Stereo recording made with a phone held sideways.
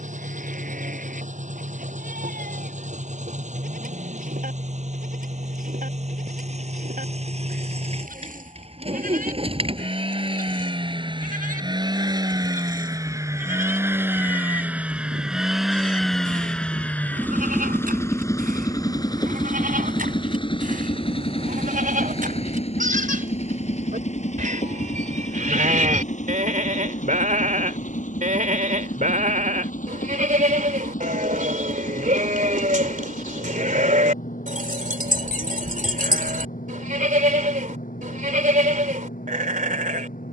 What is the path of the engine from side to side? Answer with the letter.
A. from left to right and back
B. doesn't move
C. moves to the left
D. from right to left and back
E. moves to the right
C.